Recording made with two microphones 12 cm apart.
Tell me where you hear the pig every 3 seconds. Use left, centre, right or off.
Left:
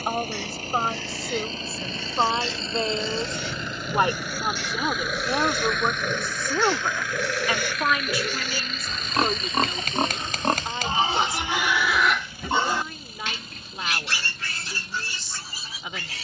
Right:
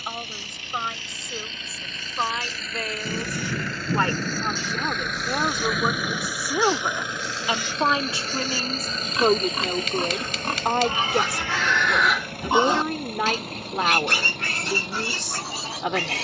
left, left, left, left, right, right.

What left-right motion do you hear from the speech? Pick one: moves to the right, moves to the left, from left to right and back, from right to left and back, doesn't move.
moves to the right.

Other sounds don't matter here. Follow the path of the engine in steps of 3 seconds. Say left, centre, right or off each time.
left, centre, right, right, right, right.